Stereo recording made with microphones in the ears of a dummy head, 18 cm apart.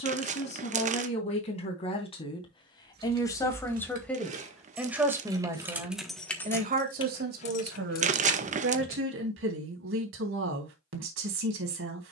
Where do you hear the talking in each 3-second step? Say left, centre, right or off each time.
left, centre, right, right.